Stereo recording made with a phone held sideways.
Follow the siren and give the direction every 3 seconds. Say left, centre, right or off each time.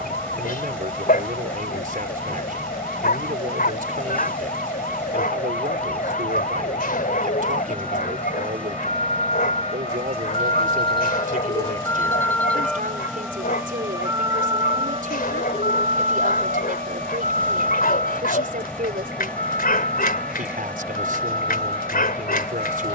left, left, left, left, centre, right, right, right.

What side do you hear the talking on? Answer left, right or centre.
right.